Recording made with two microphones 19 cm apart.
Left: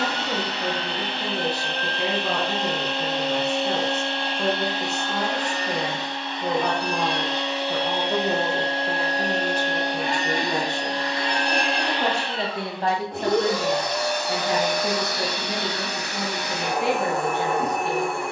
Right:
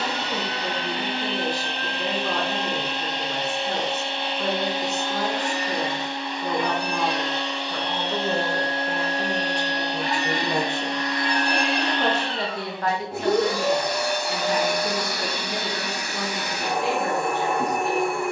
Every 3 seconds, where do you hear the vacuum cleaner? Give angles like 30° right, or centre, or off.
10° right, 10° right, centre, 30° left, 10° right, 10° right.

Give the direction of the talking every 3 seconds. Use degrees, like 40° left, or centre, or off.
60° left, 60° left, 40° left, centre, 40° left, 60° left.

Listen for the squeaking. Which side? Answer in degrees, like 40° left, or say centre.
60° left.